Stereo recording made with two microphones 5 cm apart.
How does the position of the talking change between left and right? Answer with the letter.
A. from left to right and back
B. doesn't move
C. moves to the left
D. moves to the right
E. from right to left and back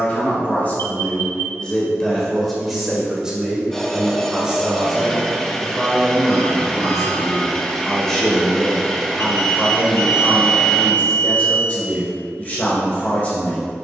A.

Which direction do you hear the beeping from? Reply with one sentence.
You can hear the beeping on the left.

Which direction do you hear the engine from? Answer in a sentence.
In this clip you hear the engine in the centre.